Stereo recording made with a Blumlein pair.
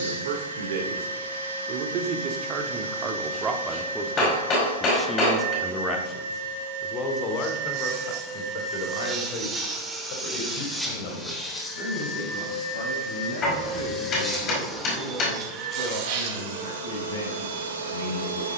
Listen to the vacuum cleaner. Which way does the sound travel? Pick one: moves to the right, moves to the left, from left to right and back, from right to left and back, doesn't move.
from right to left and back.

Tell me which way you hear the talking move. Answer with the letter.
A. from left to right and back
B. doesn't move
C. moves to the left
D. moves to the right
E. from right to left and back
C.